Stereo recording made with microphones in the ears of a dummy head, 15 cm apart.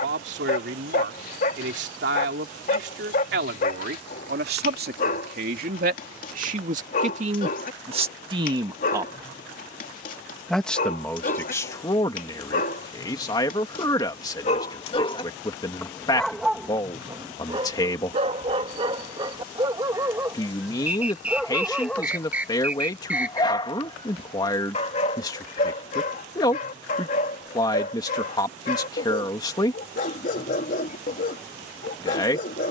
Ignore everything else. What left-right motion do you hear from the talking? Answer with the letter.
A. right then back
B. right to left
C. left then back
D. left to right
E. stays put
B.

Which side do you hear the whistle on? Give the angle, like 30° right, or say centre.
10° right.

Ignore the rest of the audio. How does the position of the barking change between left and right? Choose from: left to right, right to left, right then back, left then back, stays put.
right then back.